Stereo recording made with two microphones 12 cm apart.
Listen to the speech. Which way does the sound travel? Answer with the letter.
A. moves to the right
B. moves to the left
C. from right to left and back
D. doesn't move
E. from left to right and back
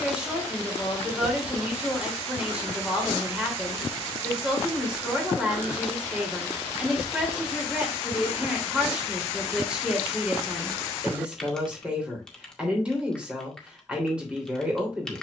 D.